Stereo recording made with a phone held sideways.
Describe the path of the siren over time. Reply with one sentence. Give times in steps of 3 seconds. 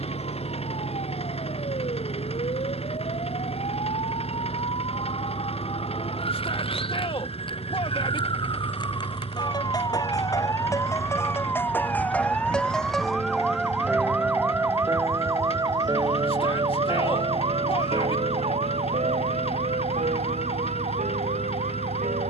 You can hear the siren on the left from 0 s, in the centre from 12 s and on the right from 15 s.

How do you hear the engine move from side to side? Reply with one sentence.
In this clip you hear the engine stay put.